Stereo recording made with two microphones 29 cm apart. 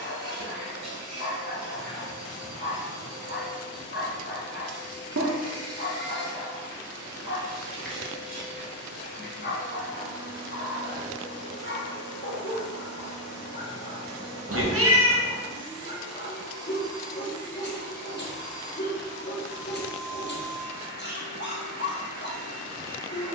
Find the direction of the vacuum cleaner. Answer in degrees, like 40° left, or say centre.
80° right.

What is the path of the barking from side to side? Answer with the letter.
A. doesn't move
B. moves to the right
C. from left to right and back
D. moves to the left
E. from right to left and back
A.